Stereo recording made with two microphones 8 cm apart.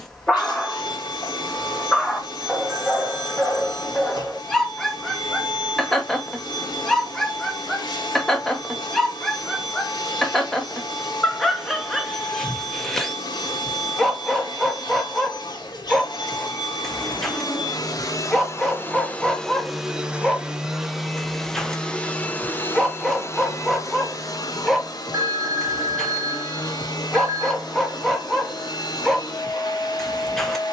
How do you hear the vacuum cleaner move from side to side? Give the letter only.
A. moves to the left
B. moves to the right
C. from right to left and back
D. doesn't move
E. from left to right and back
E.